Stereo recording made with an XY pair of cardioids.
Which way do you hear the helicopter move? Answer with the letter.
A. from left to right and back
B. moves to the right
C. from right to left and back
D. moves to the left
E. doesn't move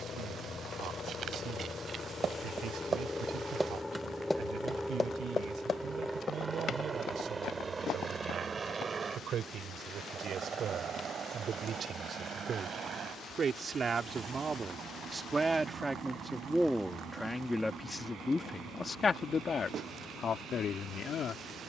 B.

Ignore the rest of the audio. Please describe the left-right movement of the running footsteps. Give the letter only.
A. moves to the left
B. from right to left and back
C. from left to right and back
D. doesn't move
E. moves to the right
A.